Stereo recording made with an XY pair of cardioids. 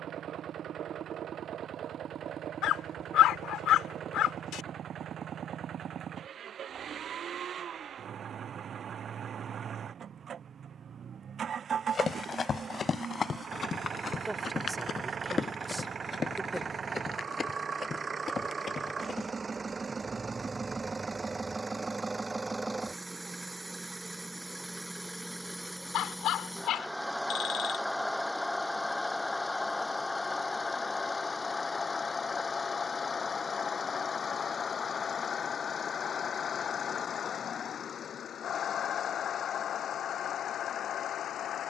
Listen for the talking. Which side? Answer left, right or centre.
centre.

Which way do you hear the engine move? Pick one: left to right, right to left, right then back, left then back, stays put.
right to left.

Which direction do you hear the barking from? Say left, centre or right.
left.